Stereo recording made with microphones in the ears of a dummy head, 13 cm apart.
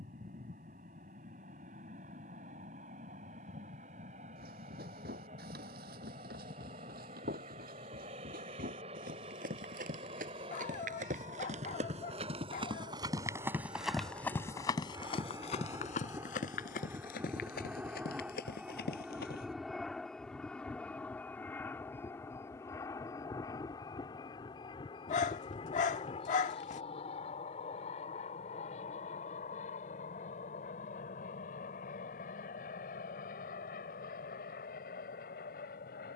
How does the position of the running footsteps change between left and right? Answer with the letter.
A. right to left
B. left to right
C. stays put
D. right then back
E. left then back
A.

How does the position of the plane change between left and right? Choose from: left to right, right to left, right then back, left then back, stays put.
right to left.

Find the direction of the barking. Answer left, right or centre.
left.